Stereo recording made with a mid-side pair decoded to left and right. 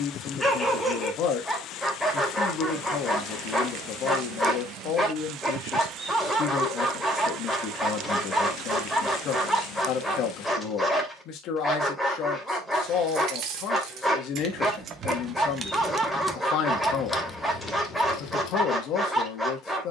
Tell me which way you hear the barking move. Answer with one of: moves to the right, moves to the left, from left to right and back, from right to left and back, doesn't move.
doesn't move.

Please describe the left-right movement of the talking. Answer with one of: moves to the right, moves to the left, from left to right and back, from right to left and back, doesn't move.
doesn't move.